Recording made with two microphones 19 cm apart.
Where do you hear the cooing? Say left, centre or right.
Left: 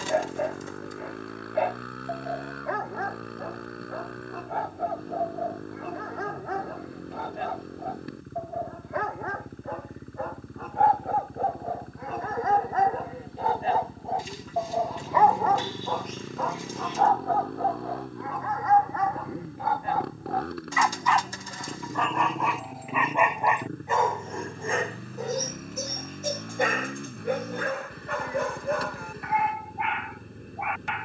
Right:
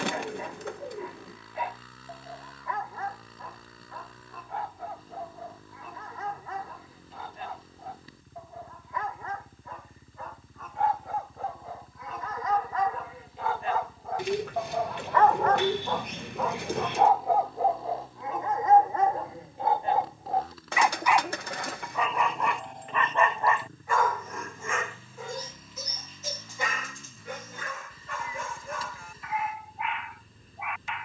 right.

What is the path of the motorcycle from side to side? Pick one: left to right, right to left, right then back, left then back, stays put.
stays put.